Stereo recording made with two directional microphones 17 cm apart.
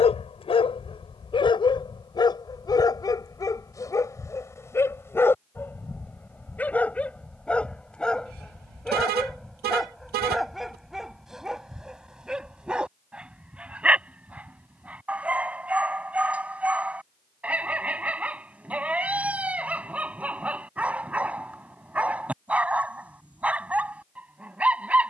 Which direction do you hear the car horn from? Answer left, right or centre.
right.